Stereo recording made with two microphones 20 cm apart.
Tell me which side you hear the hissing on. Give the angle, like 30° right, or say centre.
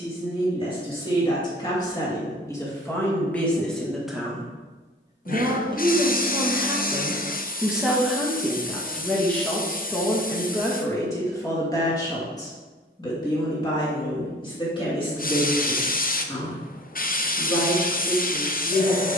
50° left.